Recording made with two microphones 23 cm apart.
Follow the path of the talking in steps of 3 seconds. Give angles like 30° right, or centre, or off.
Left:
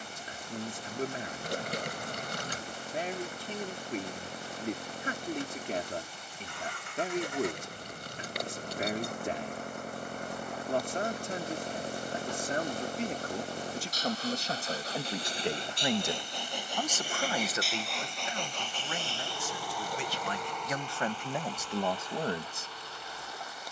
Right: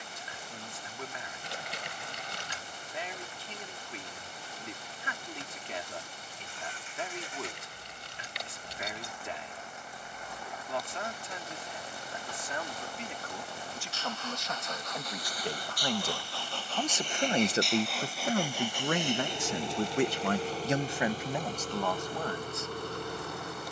50° left, 50° left, 50° left, 50° left, 40° left, centre, 60° right, 10° left.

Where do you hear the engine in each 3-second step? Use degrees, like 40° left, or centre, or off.
70° left, 70° left, 60° left, 50° left, 40° left, 20° left, 20° right, 50° right.